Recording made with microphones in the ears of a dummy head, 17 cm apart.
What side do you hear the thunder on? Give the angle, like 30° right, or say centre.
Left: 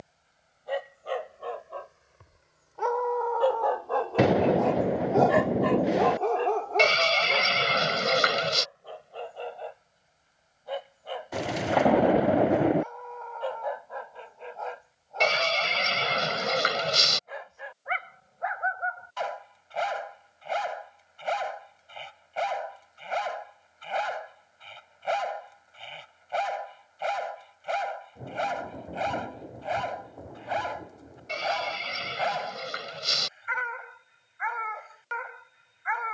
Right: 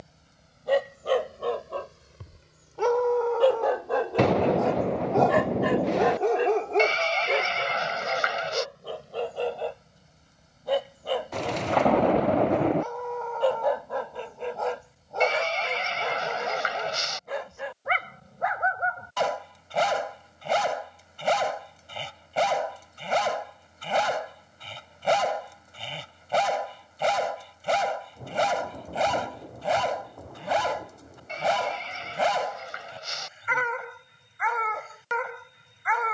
10° left.